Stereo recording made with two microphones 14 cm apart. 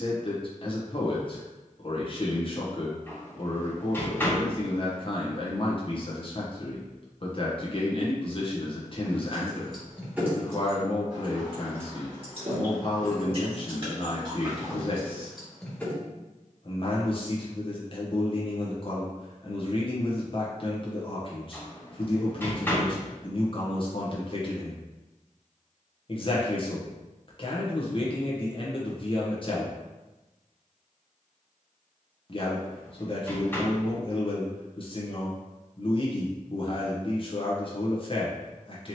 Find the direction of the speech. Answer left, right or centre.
left.